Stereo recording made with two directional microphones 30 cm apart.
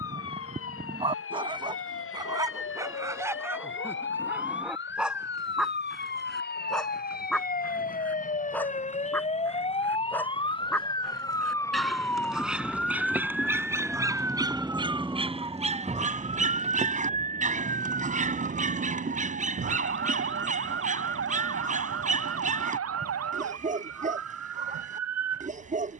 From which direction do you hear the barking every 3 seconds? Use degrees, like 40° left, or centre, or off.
20° right, 10° right, centre, centre, 10° right, 20° right, 30° right, 30° right, 30° right.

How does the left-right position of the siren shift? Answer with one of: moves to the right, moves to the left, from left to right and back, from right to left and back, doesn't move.
moves to the right.